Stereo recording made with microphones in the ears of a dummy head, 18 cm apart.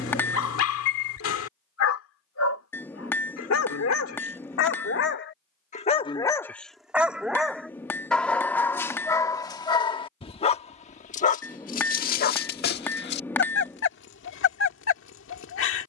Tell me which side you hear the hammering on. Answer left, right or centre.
centre.